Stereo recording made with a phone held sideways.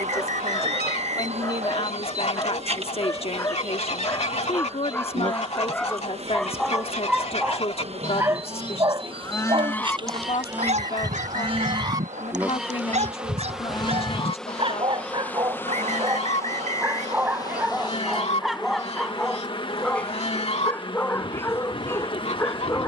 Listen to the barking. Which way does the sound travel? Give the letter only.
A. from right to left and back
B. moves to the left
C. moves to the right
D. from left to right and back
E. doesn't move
D.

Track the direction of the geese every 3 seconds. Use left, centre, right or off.
left, left, left, centre, left, left, left, left.